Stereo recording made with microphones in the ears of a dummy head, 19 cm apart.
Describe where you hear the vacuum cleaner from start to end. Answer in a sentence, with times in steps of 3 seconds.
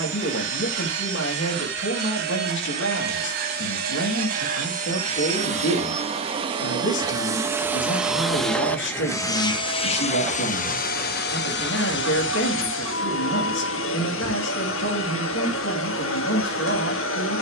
You can hear the vacuum cleaner on the right from 0 s, in the centre from 6 s and on the left from 9 s.